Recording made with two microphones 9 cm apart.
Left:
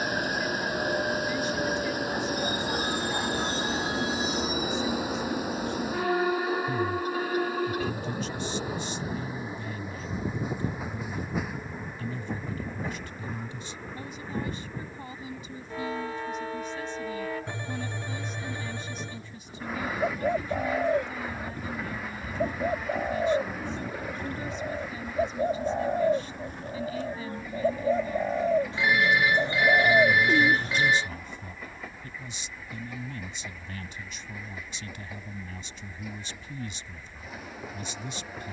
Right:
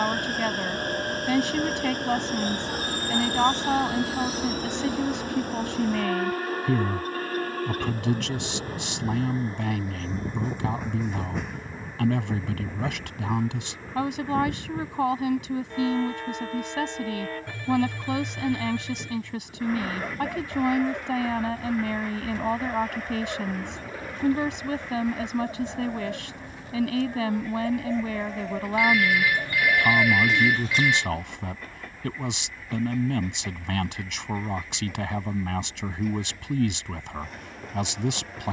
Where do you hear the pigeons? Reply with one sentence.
You can hear the pigeons on the left.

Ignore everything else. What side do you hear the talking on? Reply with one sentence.
You can hear the talking on the right.